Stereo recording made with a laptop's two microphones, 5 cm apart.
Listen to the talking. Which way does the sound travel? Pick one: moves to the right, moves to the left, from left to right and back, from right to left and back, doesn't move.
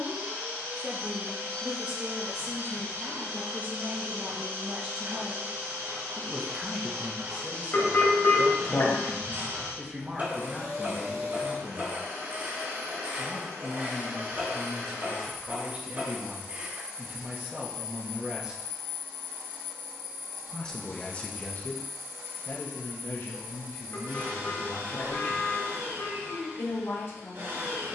moves to the left.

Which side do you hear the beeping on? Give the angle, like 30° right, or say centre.
40° left.